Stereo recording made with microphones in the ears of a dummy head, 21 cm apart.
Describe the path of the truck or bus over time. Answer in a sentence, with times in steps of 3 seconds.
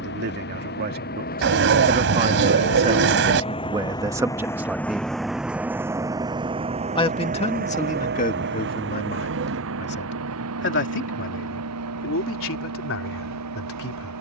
In this clip you hear the truck or bus on the left from 0 s, in the centre from 3 s and on the right from 6 s.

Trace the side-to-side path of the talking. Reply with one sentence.
You can hear the talking move from right to left.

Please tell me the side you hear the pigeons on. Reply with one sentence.
You can hear the pigeons on the right.